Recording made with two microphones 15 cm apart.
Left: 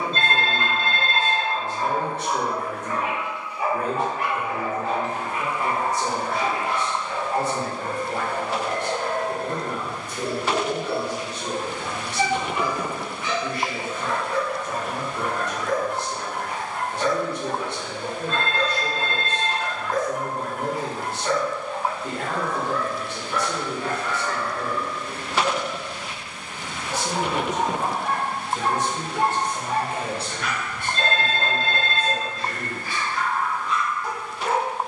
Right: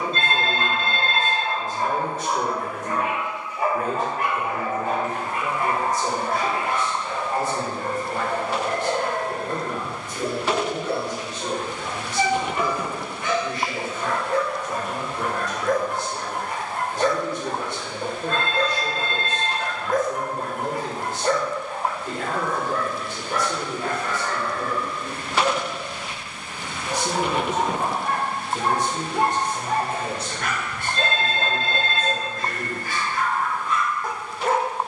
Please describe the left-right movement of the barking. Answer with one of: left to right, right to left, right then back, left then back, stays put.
stays put.